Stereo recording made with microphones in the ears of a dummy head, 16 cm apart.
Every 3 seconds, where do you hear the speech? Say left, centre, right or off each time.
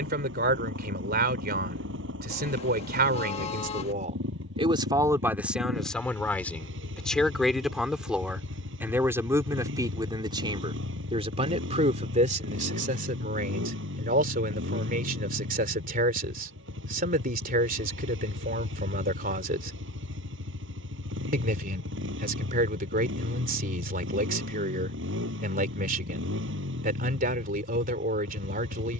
right, right, centre, right, right, right, right, right, right, right.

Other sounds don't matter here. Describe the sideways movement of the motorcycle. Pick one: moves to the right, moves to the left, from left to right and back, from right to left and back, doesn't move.
doesn't move.